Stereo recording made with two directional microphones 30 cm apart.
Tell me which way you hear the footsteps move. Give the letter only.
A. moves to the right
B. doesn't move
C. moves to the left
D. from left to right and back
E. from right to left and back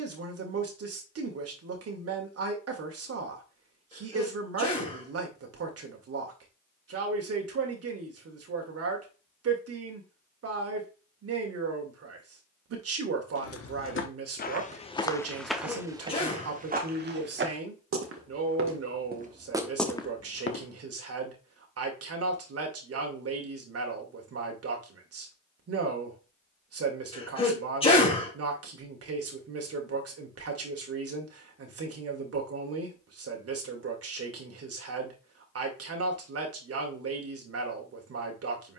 D.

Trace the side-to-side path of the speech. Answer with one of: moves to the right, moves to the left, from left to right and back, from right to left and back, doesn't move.
doesn't move.